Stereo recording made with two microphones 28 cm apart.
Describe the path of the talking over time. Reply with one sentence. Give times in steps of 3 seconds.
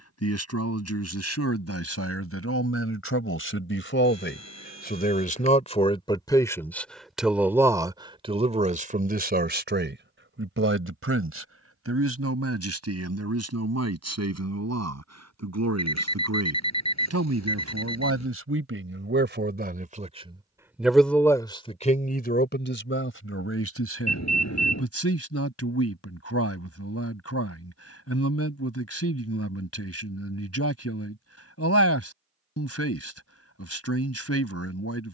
You can hear the talking on the left from 0 s, in the centre from 6 s, on the right from 9 s and on the left from 21 s.